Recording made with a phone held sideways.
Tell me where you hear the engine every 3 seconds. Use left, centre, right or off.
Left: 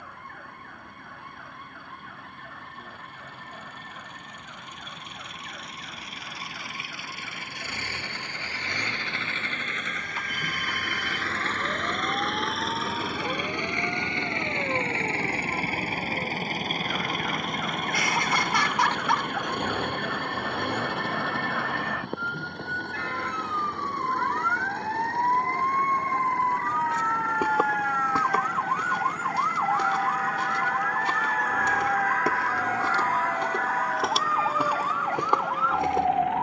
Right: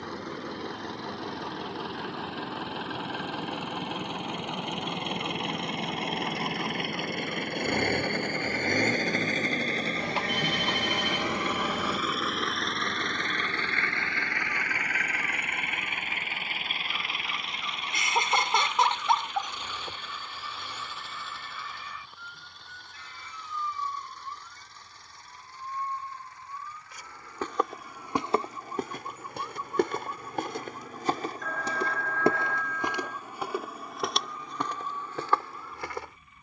right, right, right, right, centre, left, left, left, left, left, left, left.